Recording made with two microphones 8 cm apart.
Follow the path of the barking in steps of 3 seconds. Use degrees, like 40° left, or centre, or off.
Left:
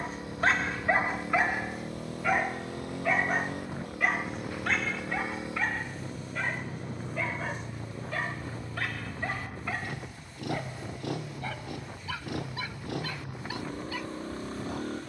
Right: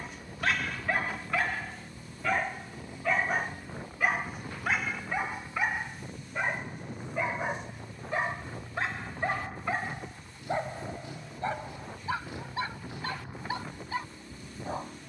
20° left, 10° right, 20° right, 30° right, 30° right.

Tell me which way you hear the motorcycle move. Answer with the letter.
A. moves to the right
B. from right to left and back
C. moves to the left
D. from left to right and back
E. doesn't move
E.